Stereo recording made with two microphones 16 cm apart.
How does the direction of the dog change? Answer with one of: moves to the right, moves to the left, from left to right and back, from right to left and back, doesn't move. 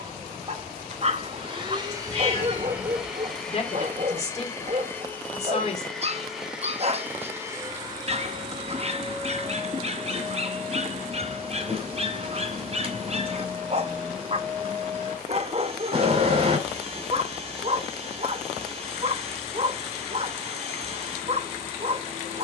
doesn't move.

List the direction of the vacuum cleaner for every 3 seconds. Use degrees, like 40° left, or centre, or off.
30° right, 10° left, 20° right, 40° right, 40° right, 40° right, 40° right, 40° right.